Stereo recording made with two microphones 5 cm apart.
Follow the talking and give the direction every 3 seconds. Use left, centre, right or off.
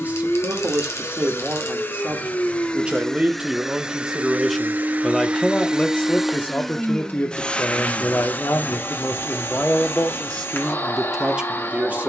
right, centre, left, centre.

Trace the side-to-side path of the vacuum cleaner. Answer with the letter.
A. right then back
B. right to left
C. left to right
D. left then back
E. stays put
A.